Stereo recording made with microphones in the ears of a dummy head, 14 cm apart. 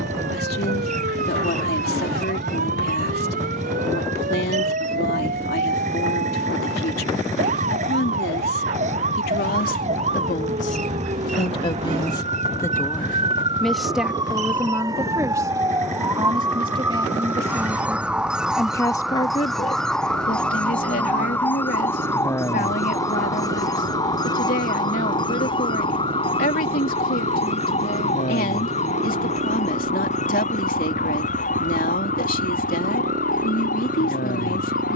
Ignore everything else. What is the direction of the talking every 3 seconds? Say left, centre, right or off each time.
left, left, left, left, centre, right, left, left, left, left, left, left.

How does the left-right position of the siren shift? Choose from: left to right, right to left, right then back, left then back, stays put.
right to left.